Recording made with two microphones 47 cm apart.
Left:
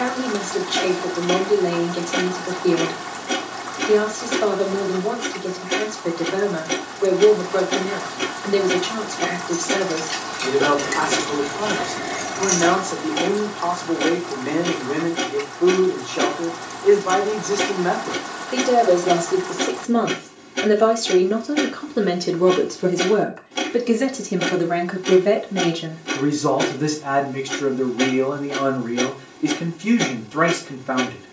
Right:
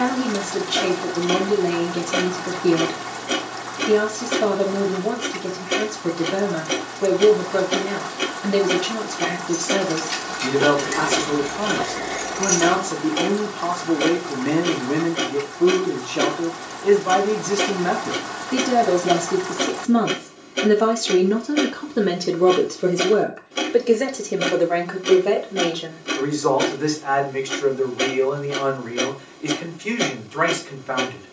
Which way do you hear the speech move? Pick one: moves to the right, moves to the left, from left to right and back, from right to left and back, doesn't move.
moves to the left.